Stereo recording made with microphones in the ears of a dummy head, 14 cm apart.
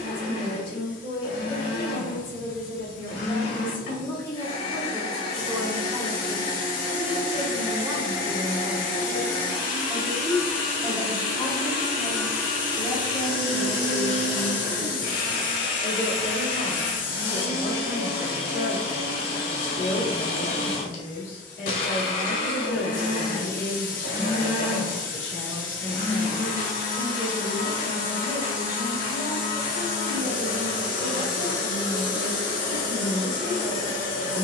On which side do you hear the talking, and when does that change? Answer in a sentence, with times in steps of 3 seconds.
You can hear the talking on the left from 0 s, in the centre from 3 s and on the left from 12 s.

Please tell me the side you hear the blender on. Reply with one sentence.
You can hear the blender on the left.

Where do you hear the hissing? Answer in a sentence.
In this clip you hear the hissing on the left.